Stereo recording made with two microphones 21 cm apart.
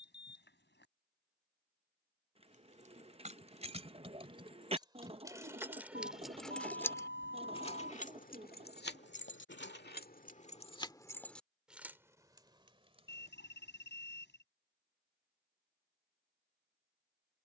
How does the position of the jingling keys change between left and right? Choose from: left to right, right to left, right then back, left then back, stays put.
left then back.